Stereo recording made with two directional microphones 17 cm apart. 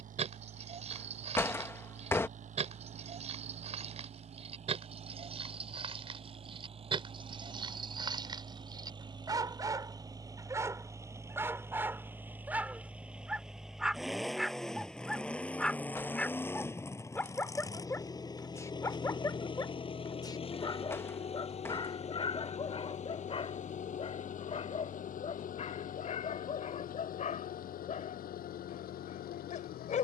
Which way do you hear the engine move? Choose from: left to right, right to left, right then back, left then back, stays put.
right to left.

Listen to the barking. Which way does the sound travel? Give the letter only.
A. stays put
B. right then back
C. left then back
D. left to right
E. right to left
E.